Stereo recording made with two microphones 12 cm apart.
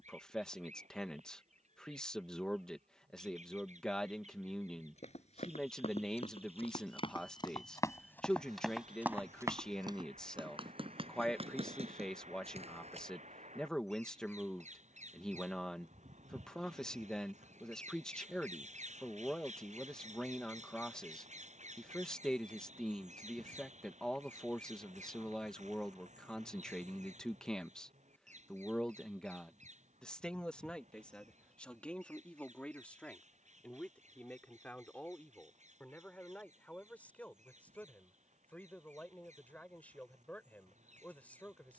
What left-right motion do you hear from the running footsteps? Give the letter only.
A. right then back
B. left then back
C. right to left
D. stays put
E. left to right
E.